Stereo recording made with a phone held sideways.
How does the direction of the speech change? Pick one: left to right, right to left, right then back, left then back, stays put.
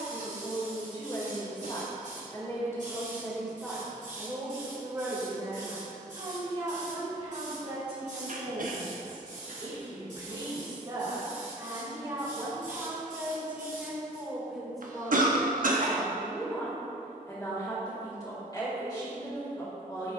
right then back.